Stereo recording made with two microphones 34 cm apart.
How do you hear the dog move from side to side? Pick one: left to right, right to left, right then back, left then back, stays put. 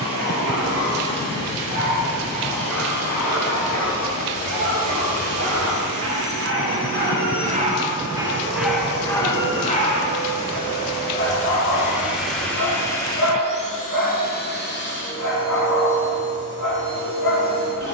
right to left.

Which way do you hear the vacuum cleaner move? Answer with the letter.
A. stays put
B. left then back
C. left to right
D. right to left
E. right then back
D.